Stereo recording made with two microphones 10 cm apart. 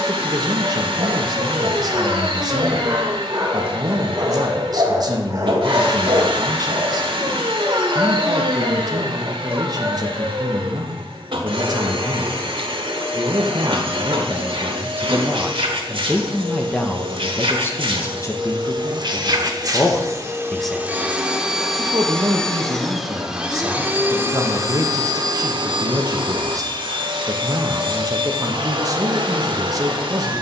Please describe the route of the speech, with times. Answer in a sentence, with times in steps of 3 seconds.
In this clip you hear the speech on the right from 0 s, in the centre from 15 s, on the left from 18 s and on the right from 21 s.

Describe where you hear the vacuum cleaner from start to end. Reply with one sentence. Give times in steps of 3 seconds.
In this clip you hear the vacuum cleaner on the right from 0 s, in the centre from 21 s and on the right from 24 s.